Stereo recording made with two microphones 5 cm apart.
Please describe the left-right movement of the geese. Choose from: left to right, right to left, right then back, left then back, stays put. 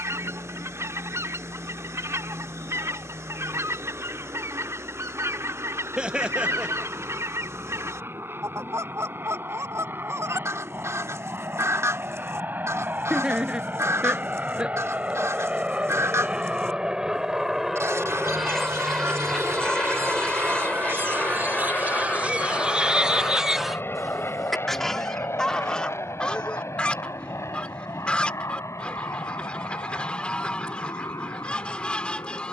right to left.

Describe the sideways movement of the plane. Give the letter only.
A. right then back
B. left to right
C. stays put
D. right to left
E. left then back
D.